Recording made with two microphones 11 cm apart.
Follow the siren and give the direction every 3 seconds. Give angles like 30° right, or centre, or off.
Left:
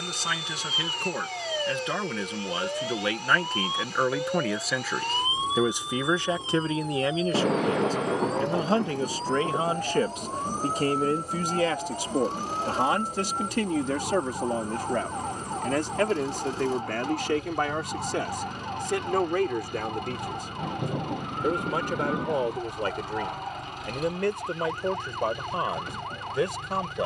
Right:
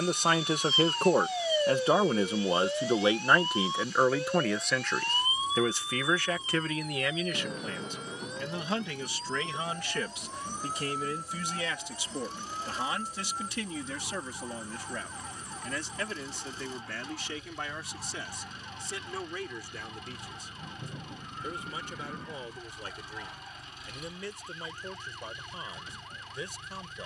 10° right, 20° left, 30° left, 40° left, 50° left, 50° left, 50° left, 50° left, 60° left.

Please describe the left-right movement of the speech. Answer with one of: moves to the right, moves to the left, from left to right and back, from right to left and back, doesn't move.
moves to the left.